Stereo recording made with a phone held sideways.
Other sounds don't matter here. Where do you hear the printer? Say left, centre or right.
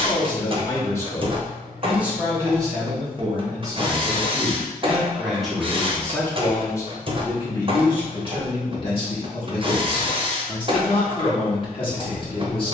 right.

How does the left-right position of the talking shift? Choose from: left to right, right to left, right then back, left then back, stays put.
right then back.